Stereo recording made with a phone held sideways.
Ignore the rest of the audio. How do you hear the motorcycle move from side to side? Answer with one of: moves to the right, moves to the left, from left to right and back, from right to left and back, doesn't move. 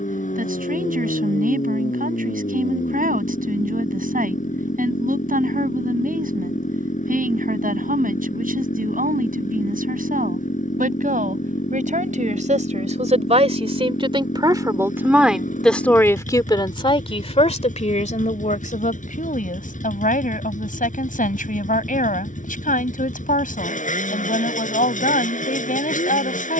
doesn't move.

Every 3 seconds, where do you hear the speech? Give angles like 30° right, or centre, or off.
70° right, 70° right, 70° right, 70° right, 40° right, 20° left, 60° left, 70° left, 70° left.